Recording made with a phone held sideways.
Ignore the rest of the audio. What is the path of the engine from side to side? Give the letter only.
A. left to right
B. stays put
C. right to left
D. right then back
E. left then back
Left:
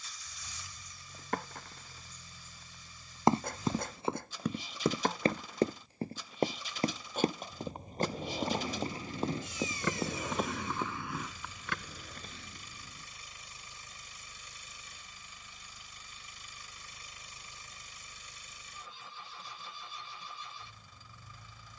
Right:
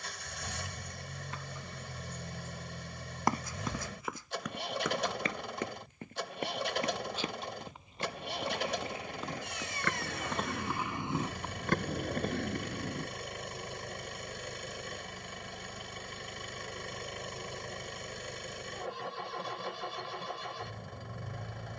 B.